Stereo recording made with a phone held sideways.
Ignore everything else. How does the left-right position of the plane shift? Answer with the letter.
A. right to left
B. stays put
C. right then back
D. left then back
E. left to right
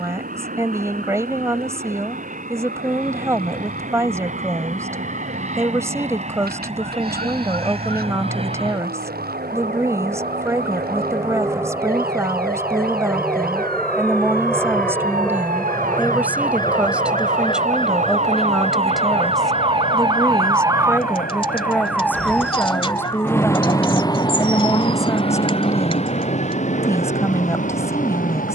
A.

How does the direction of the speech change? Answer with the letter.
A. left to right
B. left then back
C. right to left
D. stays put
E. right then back
C.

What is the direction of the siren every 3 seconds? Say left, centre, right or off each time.
right, right, right, right, right, right, right, centre, left, left.